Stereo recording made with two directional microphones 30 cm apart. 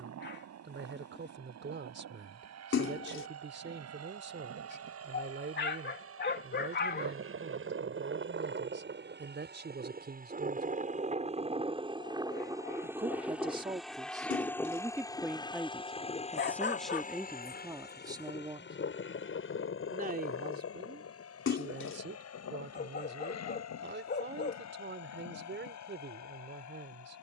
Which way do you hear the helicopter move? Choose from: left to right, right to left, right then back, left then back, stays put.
right to left.